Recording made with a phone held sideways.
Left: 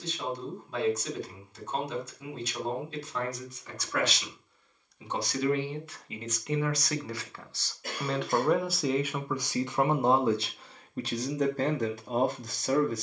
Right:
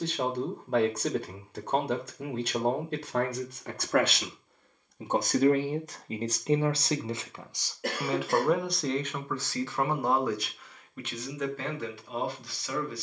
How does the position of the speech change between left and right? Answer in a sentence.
You can hear the speech move from right to left.